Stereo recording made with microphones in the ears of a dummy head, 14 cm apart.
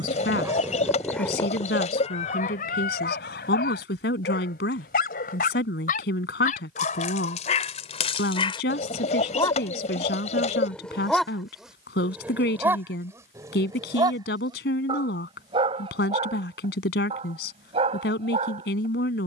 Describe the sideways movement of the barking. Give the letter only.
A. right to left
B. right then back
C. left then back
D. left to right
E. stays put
C.